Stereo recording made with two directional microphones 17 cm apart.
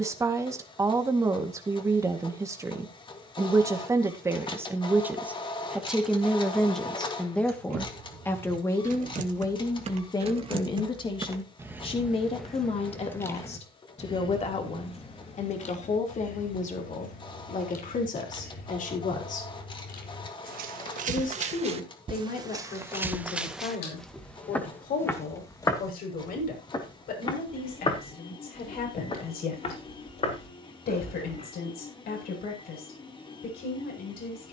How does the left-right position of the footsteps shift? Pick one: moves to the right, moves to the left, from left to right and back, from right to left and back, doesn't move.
moves to the left.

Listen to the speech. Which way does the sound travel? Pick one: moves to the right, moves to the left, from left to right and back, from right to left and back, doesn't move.
moves to the left.